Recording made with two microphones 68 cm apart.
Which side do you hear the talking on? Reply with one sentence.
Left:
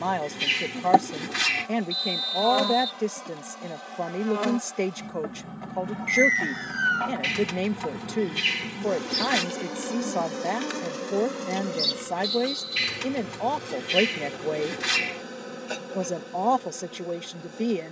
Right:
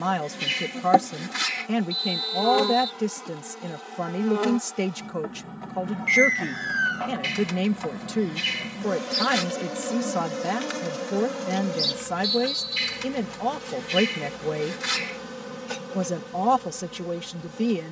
You can hear the talking on the right.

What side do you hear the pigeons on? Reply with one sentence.
In this clip you hear the pigeons on the left.